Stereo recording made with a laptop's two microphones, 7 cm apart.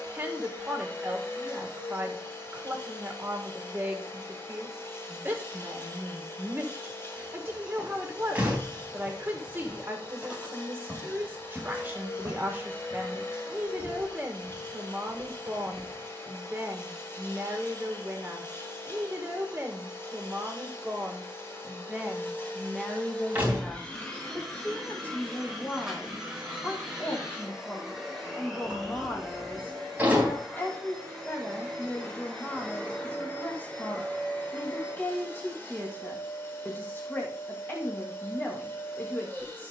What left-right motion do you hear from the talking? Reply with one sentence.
In this clip you hear the talking travel towards the left.